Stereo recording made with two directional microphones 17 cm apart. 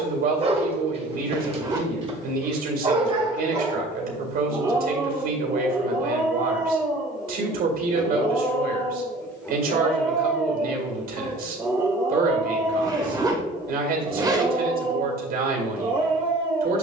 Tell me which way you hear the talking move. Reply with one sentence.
You can hear the talking stay put.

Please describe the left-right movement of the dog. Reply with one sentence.
You can hear the dog go left and come back.